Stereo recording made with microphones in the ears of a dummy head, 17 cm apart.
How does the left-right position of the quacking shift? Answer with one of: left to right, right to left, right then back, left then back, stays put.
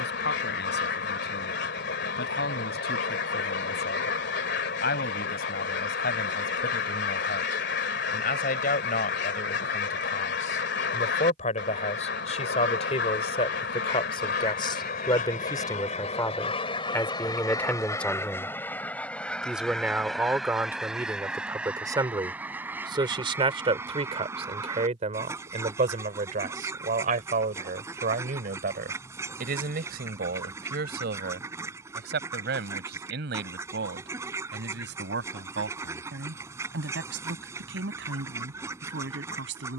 left to right.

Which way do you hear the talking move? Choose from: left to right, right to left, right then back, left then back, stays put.
left to right.